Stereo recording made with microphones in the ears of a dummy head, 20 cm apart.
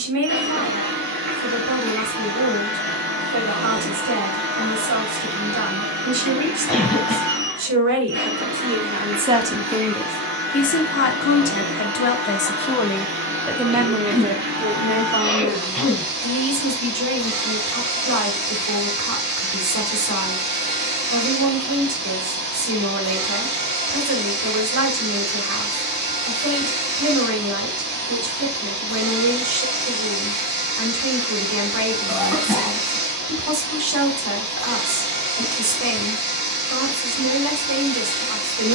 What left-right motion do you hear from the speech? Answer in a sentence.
You can hear the speech move from right to left and back again.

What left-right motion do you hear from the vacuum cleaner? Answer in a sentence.
You can hear the vacuum cleaner stay in one place.